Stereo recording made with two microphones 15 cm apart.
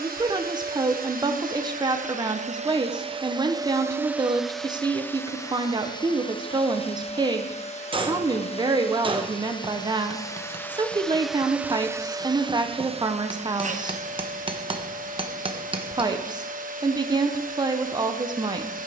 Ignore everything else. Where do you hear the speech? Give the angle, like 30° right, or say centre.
30° right.